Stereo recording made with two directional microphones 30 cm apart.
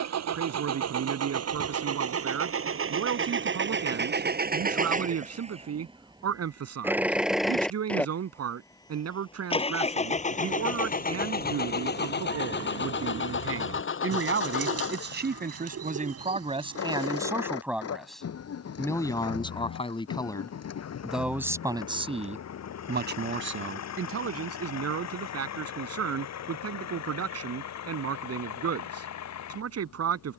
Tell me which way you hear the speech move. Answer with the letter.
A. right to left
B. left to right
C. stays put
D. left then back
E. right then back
D.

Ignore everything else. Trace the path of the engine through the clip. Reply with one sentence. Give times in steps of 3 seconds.
You can hear the engine on the right from 0 s, in the centre from 6 s and on the left from 9 s.